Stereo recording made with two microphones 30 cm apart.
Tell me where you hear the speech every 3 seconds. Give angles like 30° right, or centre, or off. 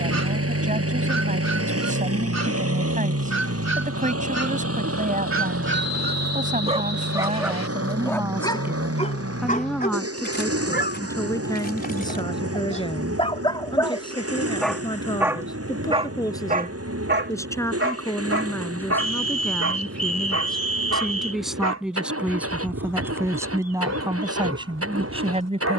30° right, 30° right, 20° right, 10° left, 20° left, 10° left, 10° left, 10° right, 20° right.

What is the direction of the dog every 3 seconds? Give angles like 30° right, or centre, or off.
70° right, 60° right, centre, 30° left, 20° left, 30° right, 60° right, 60° right, 60° right.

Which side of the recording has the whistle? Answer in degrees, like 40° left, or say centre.
60° left.